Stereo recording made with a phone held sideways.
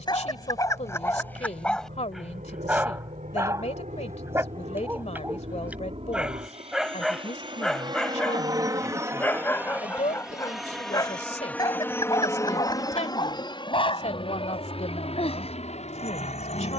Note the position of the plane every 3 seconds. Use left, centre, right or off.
right, right, right, centre, left, left.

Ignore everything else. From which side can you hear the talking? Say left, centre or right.
left.